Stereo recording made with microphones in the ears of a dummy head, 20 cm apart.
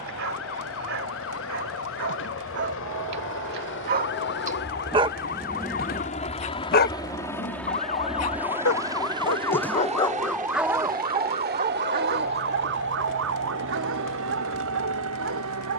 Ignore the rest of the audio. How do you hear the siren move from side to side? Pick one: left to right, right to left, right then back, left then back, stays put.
left to right.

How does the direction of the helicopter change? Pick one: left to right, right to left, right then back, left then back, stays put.
left to right.